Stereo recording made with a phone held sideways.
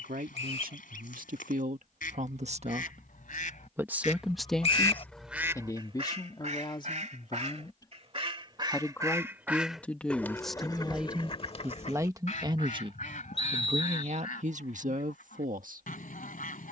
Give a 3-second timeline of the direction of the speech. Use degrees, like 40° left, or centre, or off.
60° right, centre, 30° left, centre, 40° right, 70° right.